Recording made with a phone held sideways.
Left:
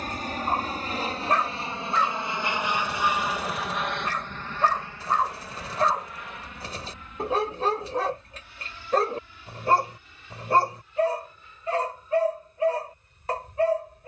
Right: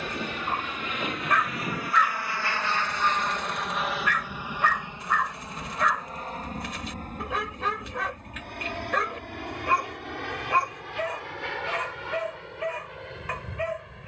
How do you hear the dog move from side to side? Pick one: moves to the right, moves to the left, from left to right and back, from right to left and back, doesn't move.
doesn't move.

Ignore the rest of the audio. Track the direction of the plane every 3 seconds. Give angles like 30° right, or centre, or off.
30° left, 10° right, 50° right, 60° right, 70° right.